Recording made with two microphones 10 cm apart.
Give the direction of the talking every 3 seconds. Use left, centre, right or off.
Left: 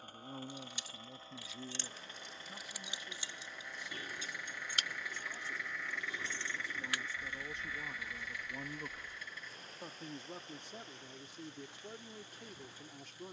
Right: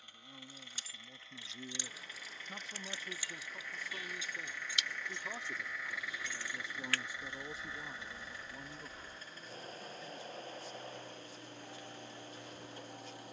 centre, right, centre, left, left.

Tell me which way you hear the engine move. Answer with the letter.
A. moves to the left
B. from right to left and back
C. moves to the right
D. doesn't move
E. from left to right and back
C.